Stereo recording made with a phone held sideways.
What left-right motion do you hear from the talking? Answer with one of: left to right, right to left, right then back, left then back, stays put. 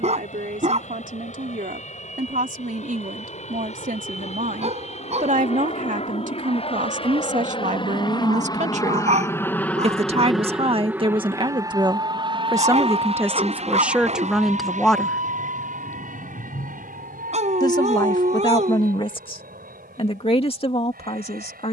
right to left.